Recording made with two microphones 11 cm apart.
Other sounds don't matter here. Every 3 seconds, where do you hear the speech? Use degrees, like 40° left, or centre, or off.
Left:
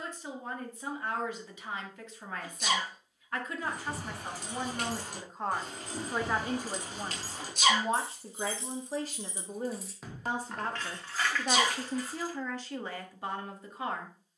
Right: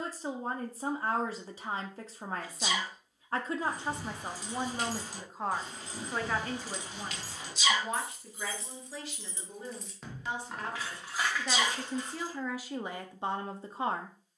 40° right, 20° right, 30° left, 40° left, 20° right.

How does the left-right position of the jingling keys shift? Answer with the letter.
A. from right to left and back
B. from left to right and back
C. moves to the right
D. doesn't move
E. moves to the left
C.